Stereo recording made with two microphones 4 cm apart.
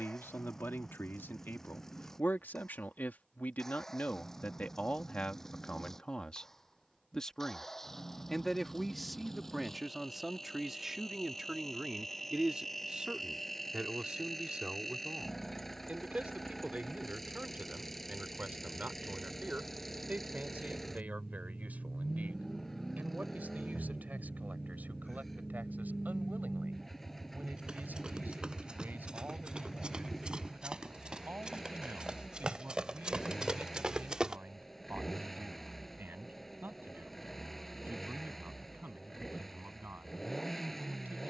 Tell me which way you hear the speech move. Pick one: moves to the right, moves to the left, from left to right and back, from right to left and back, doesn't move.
moves to the right.